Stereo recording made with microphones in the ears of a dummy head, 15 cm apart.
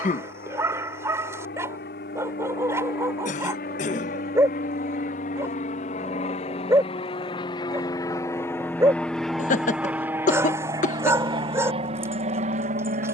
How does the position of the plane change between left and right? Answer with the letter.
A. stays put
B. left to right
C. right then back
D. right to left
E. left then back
B.